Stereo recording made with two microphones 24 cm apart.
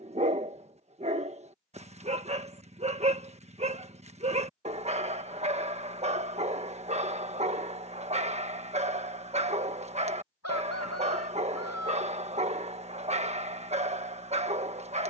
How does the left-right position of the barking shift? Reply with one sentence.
In this clip you hear the barking stay in one place.